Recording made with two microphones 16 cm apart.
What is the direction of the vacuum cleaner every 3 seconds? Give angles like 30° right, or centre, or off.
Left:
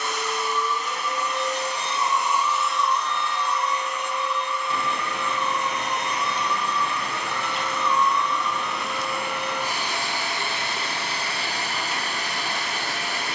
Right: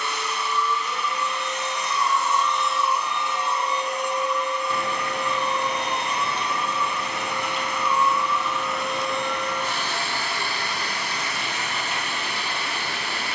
30° left, 30° right, 10° right, 20° left, 40° left.